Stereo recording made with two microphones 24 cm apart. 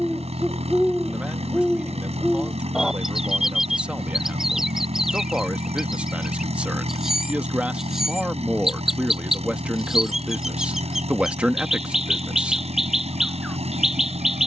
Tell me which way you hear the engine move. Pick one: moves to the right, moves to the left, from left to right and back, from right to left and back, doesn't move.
doesn't move.